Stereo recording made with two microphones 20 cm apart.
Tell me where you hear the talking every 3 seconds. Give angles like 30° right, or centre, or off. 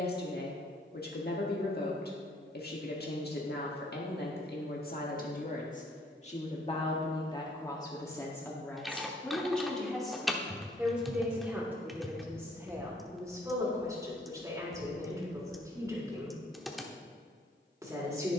50° left, 50° left, 20° left, centre, 10° right, 20° right.